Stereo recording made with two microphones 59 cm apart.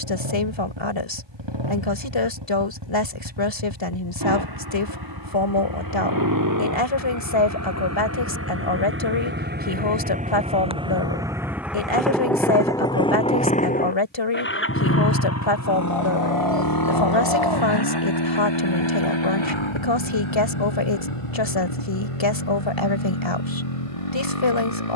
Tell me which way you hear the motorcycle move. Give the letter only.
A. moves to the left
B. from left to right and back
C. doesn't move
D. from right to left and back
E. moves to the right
A.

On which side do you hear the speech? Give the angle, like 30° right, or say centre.
50° left.